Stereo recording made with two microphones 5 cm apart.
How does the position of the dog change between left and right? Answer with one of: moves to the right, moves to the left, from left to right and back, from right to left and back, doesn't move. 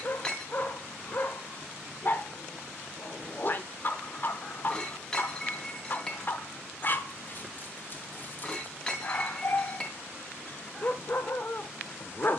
doesn't move.